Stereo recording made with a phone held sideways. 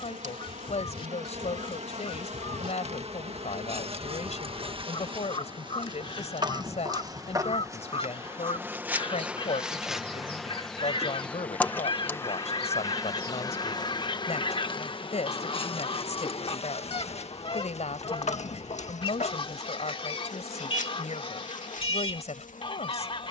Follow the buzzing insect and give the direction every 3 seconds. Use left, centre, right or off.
right, right, right, centre, left, left, left, left.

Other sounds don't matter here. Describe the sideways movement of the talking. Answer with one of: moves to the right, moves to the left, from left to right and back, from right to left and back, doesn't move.
doesn't move.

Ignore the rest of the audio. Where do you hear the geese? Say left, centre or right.
left.